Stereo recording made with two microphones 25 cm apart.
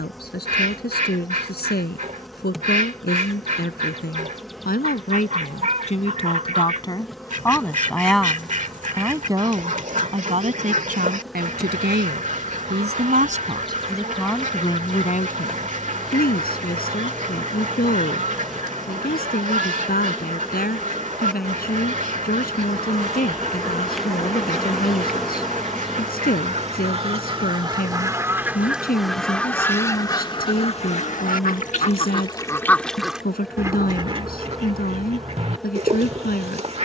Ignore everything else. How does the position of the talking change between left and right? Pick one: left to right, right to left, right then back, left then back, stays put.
right then back.